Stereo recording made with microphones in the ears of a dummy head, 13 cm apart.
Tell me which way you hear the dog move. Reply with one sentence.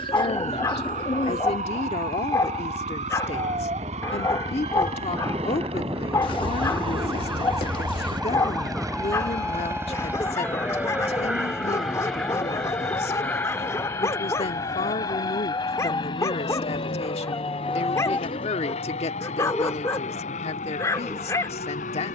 In this clip you hear the dog stay put.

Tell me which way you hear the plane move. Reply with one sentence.
In this clip you hear the plane move to the left.